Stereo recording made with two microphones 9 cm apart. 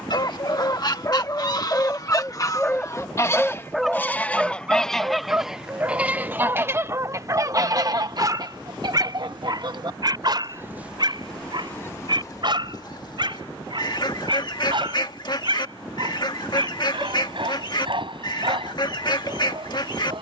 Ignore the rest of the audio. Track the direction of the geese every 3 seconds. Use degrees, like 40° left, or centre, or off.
40° left, 10° left, 40° right, 30° right, 50° left, 50° left, 50° left.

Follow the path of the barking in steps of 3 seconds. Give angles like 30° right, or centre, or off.
30° left, 10° right, 40° right, 50° right, 60° right, 60° right, 70° right.